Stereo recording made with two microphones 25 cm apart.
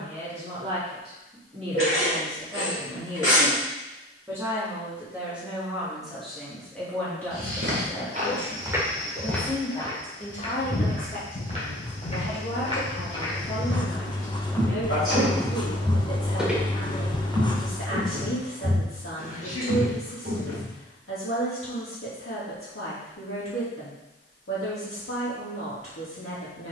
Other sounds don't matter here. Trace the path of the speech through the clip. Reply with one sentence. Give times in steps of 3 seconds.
You can hear the speech on the right from 0 s, in the centre from 3 s and on the left from 9 s.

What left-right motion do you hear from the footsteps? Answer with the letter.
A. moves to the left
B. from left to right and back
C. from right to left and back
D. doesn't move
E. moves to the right
C.